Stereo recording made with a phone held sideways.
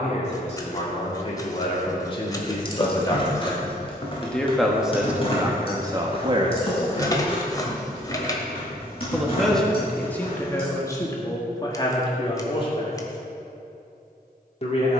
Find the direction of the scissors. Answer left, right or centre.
left.